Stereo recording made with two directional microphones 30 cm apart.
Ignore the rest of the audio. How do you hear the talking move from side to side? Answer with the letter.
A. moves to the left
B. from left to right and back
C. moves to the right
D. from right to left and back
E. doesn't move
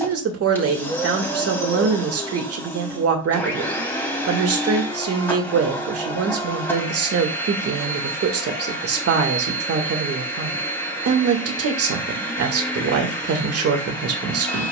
E.